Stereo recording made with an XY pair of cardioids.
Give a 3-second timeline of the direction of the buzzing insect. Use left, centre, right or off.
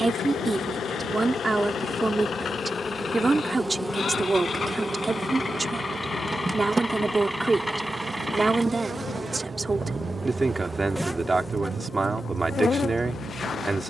left, centre, right, centre, left.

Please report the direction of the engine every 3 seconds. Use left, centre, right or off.
left, left, centre, right, right.